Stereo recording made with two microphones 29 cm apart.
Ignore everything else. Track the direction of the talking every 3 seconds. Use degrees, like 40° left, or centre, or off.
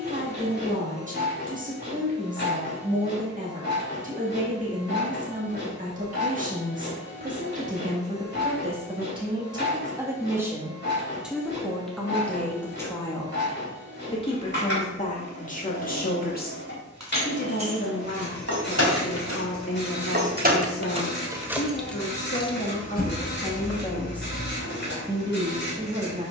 30° right, 30° right, 20° right, 10° right, 10° left, 30° left, 50° left, 30° left, 10° right.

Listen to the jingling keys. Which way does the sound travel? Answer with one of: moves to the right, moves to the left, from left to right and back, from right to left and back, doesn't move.
moves to the left.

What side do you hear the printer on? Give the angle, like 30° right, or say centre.
40° left.